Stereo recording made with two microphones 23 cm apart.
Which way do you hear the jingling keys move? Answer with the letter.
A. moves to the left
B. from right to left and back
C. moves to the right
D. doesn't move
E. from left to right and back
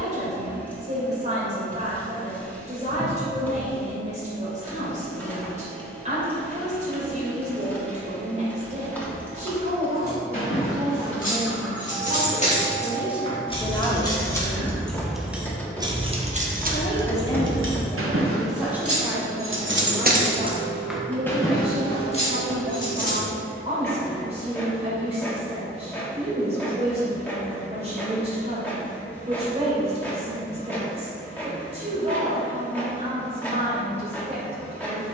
E.